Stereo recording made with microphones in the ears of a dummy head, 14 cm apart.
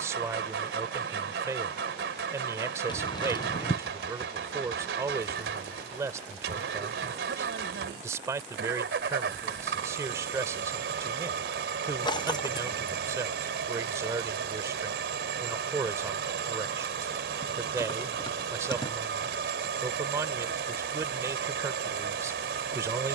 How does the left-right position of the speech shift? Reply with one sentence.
In this clip you hear the speech stay put.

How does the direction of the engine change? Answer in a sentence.
You can hear the engine stay put.